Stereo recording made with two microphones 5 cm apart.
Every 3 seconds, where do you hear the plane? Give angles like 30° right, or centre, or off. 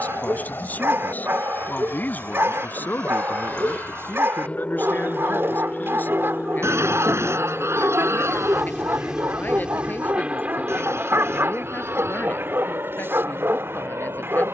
40° left, 30° left, centre, 20° right, 40° right.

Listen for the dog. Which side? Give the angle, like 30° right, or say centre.
50° right.